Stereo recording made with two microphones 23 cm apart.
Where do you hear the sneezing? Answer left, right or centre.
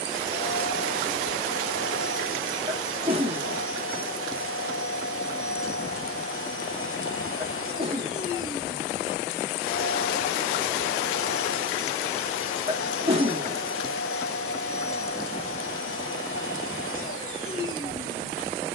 right.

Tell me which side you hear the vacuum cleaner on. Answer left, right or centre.
left.